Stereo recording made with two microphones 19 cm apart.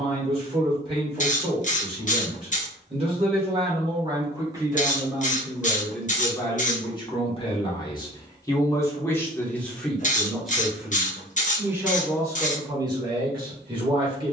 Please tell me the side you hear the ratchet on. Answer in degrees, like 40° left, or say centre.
40° left.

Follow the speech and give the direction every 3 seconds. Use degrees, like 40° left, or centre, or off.
30° right, 20° right, 20° left, centre, 20° right.